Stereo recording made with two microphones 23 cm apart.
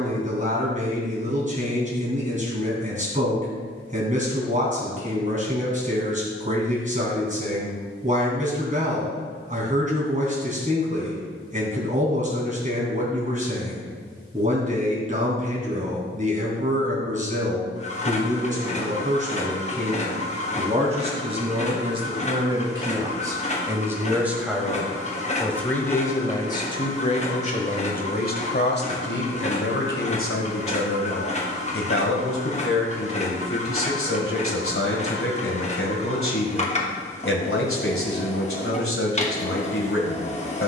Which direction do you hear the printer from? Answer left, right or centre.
left.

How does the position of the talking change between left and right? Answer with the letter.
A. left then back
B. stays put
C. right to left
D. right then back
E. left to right
C.